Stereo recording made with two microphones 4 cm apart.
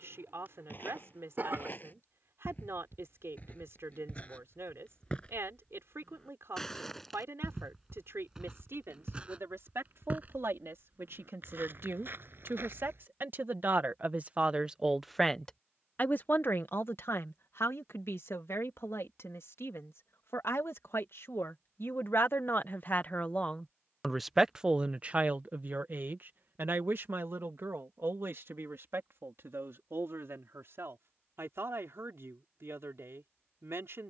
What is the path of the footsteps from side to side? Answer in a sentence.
You can hear the footsteps go from the left side to the right.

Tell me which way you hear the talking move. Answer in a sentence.
In this clip you hear the talking move from right to left and back again.